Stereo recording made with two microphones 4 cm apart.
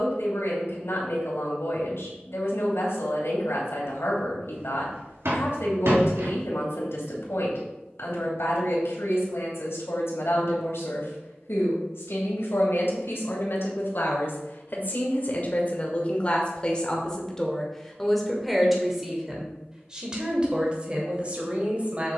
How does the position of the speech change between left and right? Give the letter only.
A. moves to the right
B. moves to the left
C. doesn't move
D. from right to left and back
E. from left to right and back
A.